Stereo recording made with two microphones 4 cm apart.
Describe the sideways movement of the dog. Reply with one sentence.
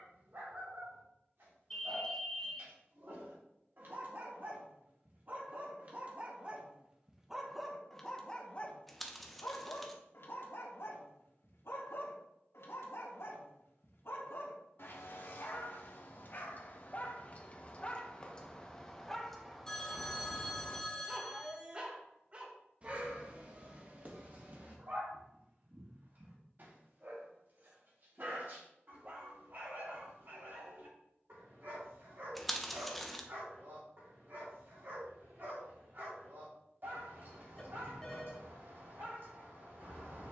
You can hear the dog move from right to left and back again.